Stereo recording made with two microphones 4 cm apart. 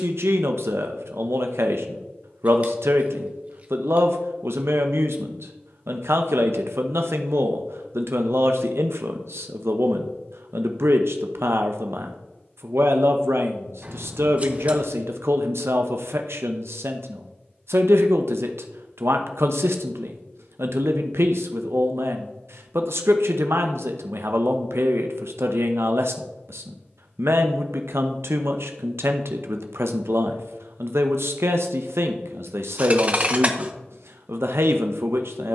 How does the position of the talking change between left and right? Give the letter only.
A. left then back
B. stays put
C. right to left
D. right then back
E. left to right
B.